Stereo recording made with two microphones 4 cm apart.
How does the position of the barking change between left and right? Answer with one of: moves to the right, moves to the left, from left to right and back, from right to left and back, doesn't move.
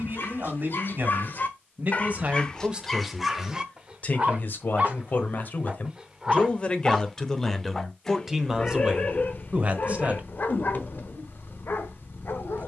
from left to right and back.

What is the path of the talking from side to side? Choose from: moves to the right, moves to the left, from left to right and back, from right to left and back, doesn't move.
from right to left and back.